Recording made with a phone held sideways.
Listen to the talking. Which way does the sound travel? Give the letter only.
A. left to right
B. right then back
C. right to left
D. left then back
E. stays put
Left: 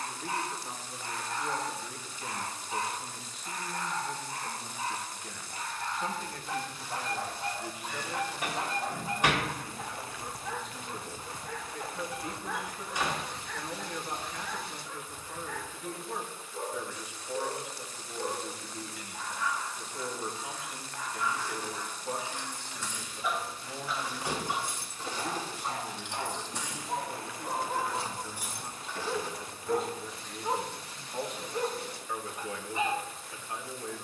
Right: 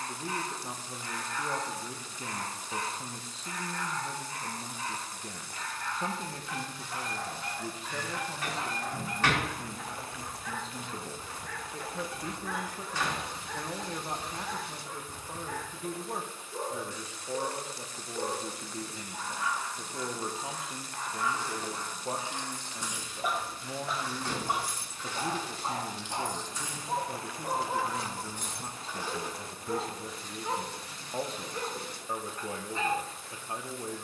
E.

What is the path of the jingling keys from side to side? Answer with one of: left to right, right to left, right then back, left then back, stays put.
left then back.